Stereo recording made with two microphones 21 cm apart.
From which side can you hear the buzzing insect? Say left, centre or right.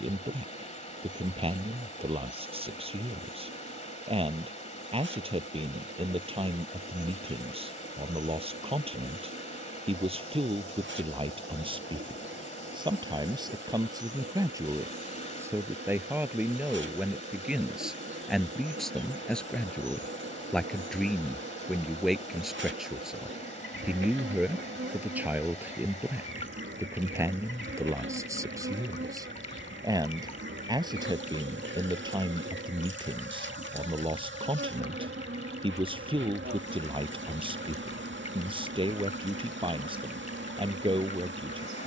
right.